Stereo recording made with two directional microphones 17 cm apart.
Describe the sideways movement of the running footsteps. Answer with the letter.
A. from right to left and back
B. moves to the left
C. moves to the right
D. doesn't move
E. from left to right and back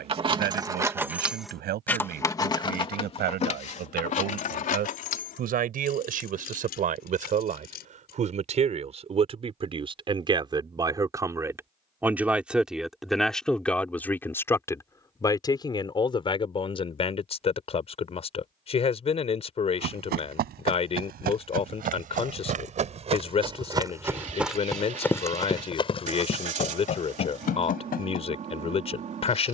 B.